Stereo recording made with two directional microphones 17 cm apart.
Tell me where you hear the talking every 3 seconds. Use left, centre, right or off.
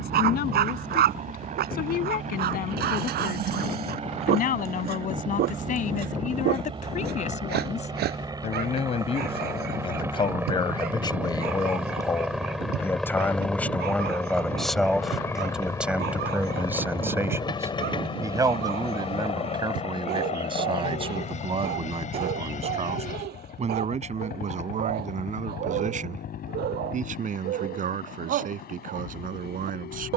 left, left, left, left, centre, centre, right, right, right, right.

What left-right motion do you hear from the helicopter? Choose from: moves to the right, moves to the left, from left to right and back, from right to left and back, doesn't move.
moves to the left.